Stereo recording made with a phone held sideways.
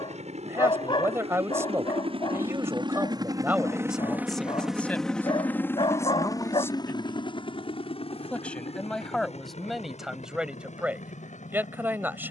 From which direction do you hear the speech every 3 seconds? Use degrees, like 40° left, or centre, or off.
20° right, centre, 10° left, 10° right.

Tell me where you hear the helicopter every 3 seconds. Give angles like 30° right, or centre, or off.
50° right, 10° right, 40° left, 60° left.